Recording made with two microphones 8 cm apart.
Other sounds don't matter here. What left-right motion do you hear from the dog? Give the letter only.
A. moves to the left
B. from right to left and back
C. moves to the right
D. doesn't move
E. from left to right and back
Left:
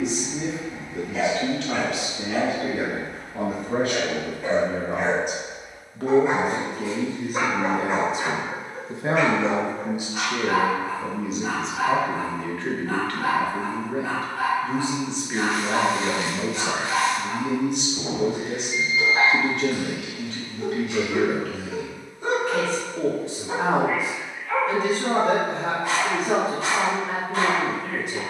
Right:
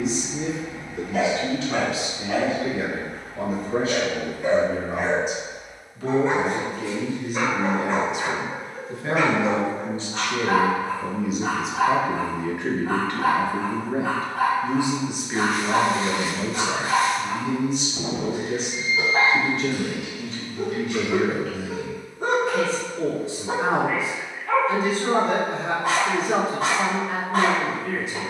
B.